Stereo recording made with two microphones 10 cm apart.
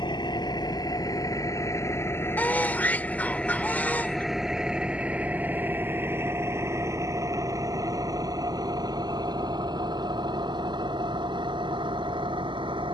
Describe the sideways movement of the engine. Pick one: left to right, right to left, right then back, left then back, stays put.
left to right.